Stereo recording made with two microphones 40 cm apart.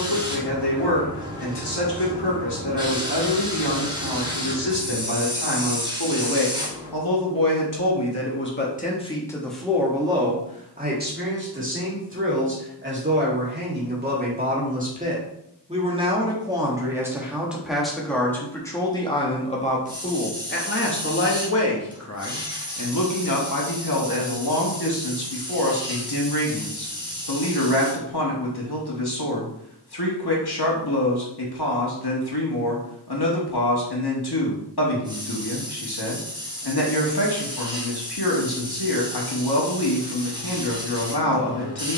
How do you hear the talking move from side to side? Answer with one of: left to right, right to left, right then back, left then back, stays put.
right then back.